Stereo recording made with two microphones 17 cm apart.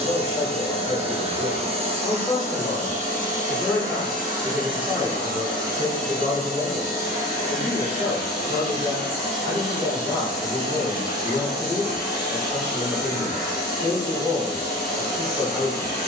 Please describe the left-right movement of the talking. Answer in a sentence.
You can hear the talking go right and come back.